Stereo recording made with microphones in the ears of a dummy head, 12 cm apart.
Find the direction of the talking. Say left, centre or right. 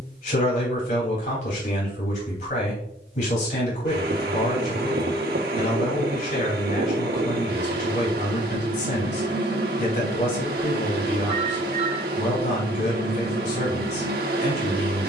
left.